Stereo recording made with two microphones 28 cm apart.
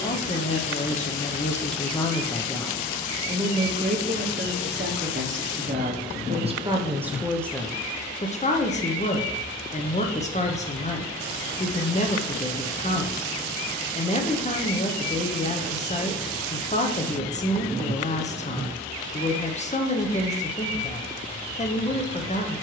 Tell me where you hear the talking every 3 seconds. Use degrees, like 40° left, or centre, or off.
20° left, 30° right, centre, 20° left, 20° left, 20° left, 20° left, 20° left.